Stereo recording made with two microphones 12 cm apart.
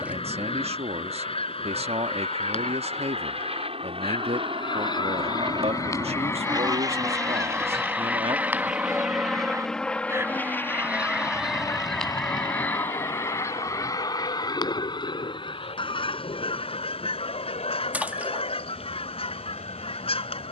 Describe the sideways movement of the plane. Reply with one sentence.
In this clip you hear the plane go from the right side to the left.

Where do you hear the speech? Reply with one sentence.
You can hear the speech on the right.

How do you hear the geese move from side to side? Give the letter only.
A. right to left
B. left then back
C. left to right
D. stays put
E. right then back
E.